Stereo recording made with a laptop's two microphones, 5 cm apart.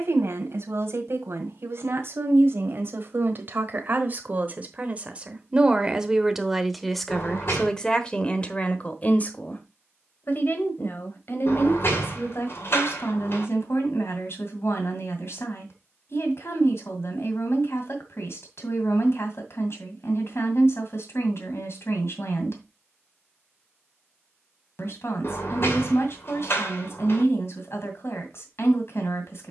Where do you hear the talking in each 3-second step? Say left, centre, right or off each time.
right, right, centre, left, left, left, left, left, left, left.